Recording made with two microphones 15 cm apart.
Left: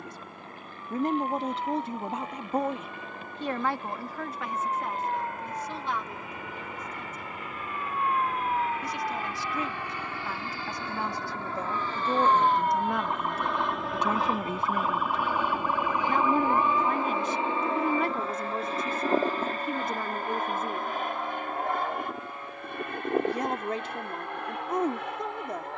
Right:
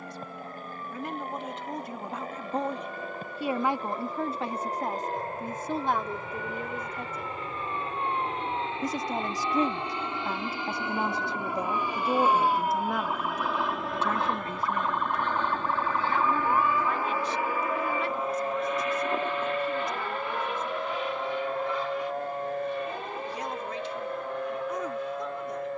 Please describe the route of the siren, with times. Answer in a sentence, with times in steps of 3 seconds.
In this clip you hear the siren on the left from 0 s, in the centre from 12 s and on the right from 18 s.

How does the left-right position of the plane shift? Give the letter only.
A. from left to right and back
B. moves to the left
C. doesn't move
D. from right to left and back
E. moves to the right
B.